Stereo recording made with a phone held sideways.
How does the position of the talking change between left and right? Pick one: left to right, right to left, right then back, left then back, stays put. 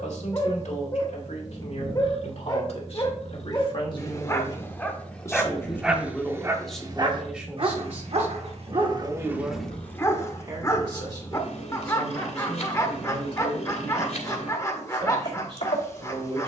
left to right.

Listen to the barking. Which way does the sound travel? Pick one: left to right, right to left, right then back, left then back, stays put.
right then back.